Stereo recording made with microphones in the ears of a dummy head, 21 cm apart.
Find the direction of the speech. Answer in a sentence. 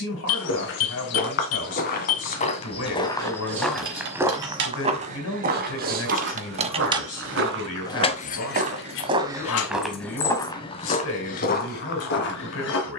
In this clip you hear the speech on the left.